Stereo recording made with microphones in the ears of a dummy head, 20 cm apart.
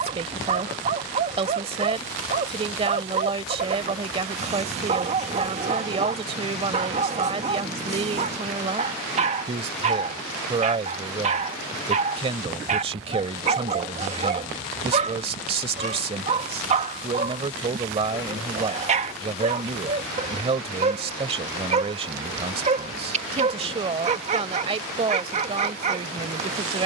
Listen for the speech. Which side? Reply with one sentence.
In this clip you hear the speech on the right.